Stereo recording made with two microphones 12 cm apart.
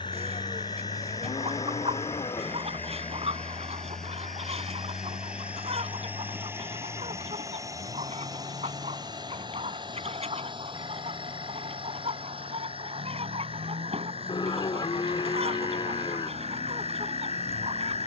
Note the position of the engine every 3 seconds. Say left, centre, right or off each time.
left, centre, right, right, right, right.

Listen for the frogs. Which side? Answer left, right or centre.
left.